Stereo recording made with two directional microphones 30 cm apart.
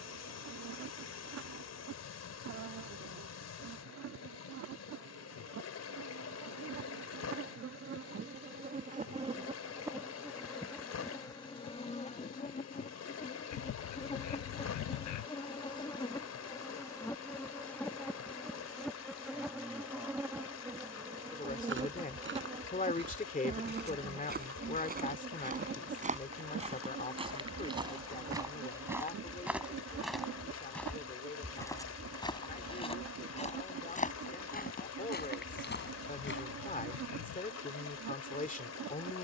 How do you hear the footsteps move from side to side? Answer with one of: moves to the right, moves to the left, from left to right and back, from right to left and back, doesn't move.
moves to the left.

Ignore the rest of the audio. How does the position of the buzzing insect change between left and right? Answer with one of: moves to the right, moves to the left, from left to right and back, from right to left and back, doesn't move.
from right to left and back.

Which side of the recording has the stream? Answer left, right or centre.
left.